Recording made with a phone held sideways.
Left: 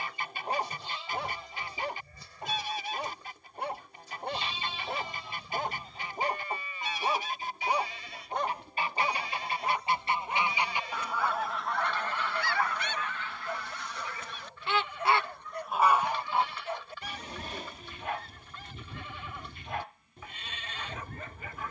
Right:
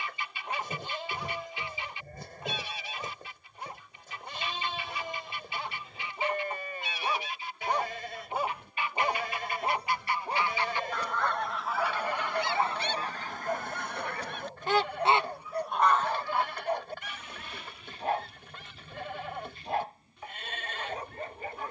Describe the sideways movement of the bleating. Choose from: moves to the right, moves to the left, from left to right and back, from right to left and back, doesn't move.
doesn't move.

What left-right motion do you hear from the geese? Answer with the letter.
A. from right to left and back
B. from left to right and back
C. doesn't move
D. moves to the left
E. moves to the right
B.